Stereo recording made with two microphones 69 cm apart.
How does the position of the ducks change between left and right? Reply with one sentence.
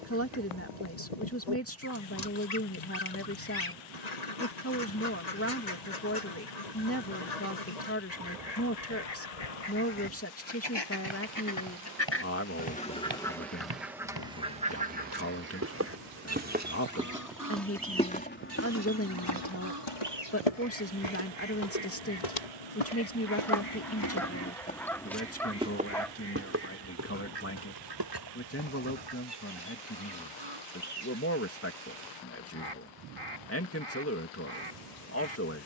In this clip you hear the ducks go from the left side to the right.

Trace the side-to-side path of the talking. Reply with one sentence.
In this clip you hear the talking stay put.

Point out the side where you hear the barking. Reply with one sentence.
In this clip you hear the barking in the centre.